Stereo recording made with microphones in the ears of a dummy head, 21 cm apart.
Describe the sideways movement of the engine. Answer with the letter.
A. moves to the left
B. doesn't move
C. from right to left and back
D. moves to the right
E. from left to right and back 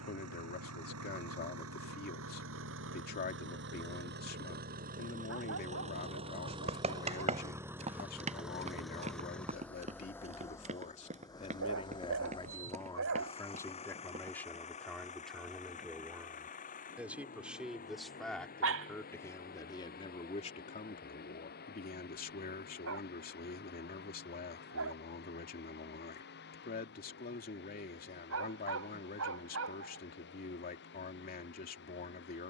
A.